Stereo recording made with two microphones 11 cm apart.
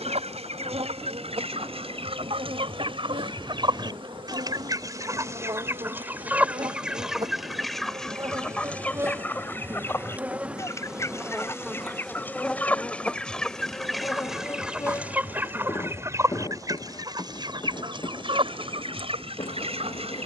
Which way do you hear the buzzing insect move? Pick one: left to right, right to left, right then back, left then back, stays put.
right to left.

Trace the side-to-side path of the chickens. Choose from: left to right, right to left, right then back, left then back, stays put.
left then back.